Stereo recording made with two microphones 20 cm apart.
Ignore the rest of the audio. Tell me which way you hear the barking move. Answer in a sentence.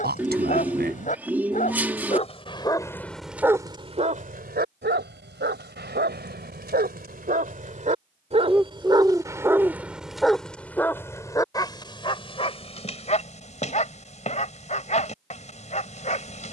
In this clip you hear the barking move from left to right and back again.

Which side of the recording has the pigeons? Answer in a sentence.
In this clip you hear the pigeons in the centre.